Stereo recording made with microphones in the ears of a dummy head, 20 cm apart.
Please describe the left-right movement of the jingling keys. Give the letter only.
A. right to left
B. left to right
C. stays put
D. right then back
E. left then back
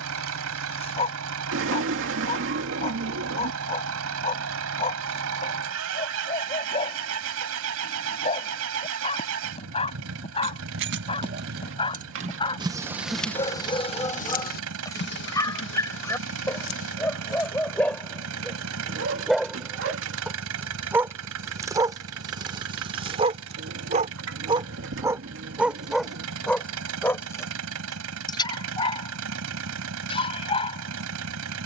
A.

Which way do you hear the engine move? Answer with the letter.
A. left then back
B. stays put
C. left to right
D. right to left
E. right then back
B.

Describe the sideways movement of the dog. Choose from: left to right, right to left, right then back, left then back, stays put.
right then back.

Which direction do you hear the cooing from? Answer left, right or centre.
right.